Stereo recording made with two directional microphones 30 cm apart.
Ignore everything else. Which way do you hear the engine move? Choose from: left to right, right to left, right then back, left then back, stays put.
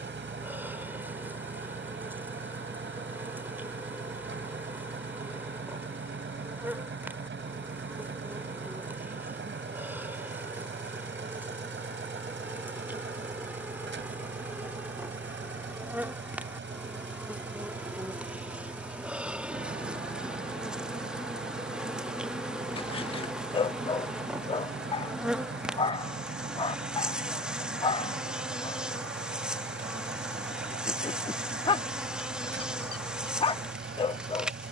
stays put.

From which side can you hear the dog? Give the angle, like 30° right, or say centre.
20° left.